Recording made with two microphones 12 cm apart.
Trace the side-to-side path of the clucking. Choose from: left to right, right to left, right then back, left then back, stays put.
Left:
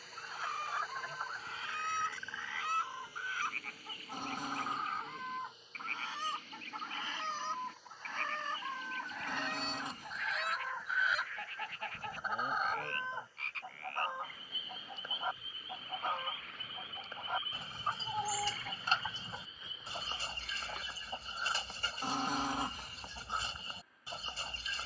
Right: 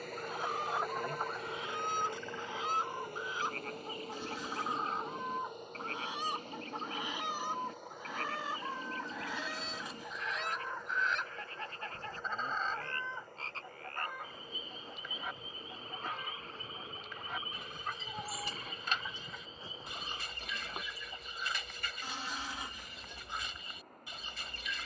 right to left.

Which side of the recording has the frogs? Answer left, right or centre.
right.